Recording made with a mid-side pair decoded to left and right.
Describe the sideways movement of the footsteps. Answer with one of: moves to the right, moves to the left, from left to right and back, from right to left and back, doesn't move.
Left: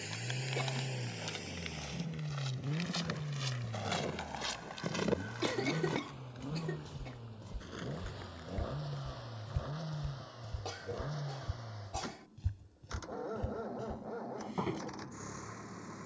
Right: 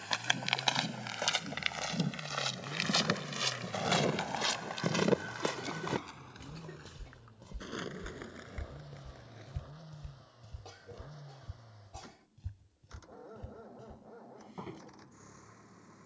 moves to the left.